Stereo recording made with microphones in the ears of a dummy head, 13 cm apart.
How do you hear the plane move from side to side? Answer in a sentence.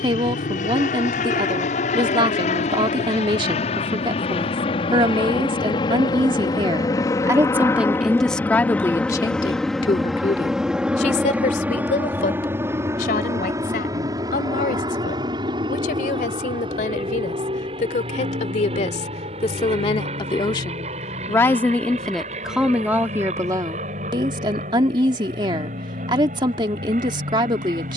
In this clip you hear the plane travel towards the right.